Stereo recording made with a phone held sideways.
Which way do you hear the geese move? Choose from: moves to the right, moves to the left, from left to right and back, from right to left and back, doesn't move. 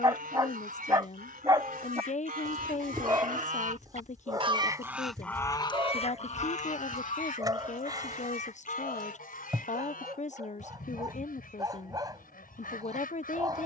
moves to the left.